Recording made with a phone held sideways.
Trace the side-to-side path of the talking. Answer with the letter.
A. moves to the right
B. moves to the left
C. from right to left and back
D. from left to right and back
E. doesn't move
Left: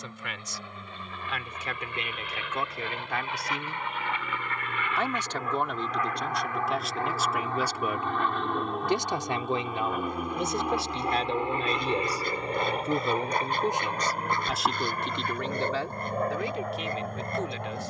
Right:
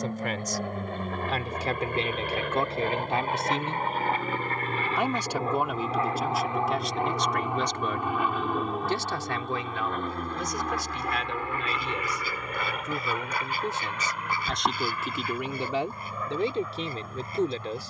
C.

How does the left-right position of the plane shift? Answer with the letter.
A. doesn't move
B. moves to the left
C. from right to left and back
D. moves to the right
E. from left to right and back
B.